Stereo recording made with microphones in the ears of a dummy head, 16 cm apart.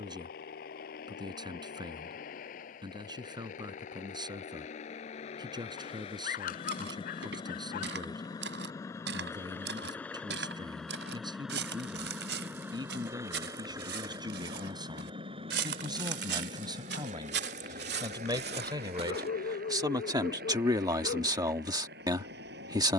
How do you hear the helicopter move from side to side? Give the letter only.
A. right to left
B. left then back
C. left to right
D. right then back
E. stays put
C.